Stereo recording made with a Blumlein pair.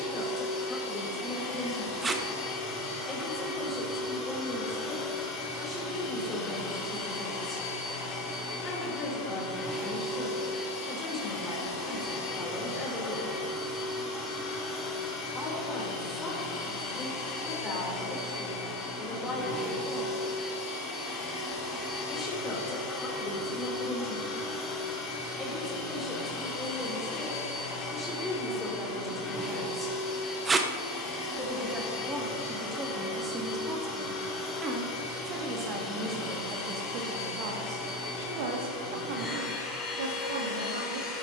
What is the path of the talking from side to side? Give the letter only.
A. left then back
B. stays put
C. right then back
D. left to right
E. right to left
D.